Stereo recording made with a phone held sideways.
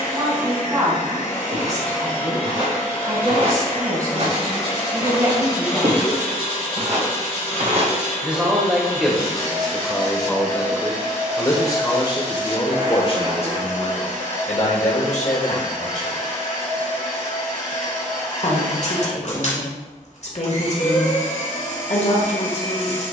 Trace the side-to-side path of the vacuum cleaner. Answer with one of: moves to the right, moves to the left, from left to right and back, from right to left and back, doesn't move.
doesn't move.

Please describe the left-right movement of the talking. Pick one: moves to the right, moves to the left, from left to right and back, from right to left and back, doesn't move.
moves to the left.